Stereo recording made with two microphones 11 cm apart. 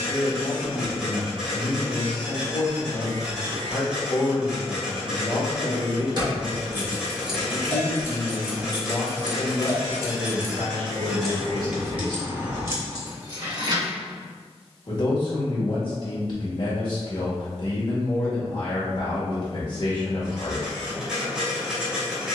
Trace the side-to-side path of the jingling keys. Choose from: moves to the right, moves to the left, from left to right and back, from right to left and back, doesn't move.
from right to left and back.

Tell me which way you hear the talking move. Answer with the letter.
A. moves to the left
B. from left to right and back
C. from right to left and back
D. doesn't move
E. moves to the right
D.